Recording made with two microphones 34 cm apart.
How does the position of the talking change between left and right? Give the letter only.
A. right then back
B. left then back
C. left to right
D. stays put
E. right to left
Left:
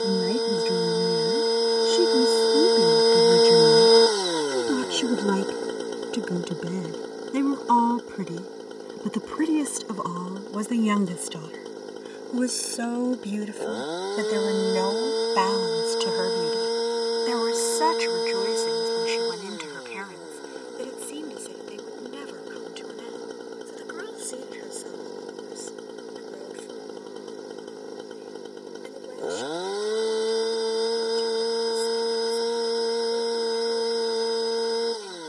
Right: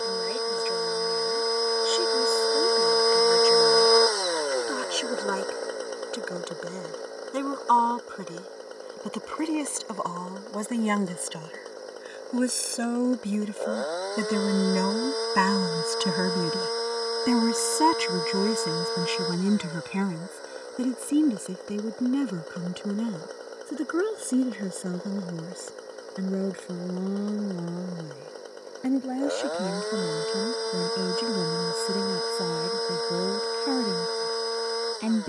C.